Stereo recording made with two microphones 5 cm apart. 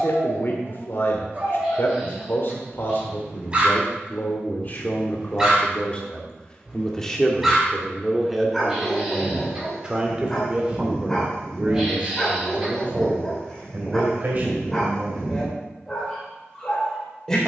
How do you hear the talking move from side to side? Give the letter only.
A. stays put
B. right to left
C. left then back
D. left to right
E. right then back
D.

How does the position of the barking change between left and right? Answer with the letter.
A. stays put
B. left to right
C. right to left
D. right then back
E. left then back
C.